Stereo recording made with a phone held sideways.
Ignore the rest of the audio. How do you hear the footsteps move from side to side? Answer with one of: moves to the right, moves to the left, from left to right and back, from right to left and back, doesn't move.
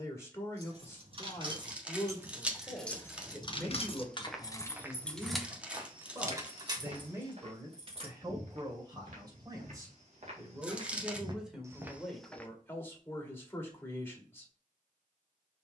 from left to right and back.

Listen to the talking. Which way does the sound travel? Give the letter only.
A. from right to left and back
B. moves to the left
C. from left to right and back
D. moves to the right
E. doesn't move
C.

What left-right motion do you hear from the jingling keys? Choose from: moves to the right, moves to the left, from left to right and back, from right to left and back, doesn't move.
from right to left and back.